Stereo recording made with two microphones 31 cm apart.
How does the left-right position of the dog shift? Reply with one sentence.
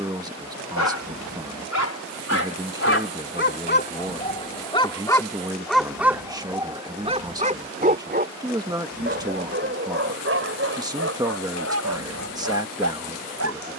In this clip you hear the dog go from the left side to the right.